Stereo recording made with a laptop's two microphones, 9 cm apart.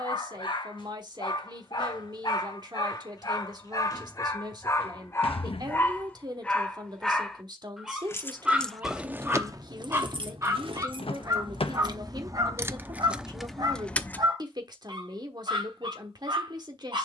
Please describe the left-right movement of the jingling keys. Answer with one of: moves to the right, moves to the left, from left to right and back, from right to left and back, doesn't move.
from left to right and back.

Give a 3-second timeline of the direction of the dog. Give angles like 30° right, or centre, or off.
60° left, 30° left, centre, 30° right, 50° right, 60° right.